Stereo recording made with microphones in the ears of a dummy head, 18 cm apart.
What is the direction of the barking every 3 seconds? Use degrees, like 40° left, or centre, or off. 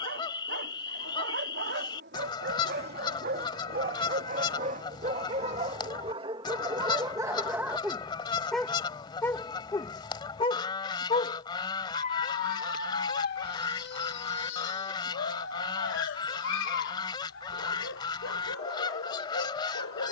60° right, 40° right, 10° right, 20° left, 50° left, 60° left, 70° left.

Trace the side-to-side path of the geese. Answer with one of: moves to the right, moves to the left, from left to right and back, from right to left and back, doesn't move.
doesn't move.